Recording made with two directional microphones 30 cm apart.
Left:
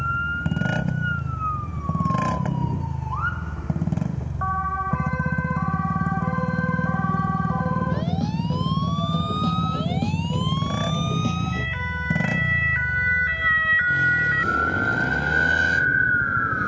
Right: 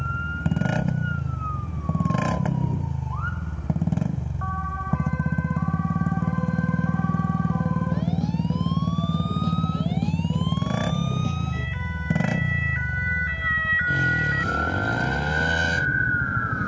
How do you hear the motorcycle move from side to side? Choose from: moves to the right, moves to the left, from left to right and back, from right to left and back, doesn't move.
doesn't move.